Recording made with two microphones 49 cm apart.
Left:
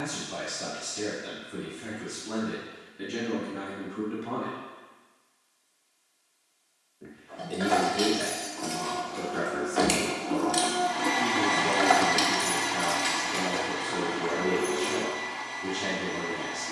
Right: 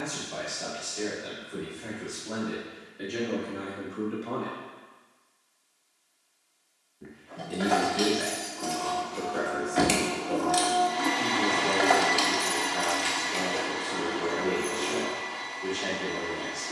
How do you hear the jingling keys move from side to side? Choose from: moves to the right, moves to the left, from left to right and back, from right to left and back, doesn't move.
moves to the left.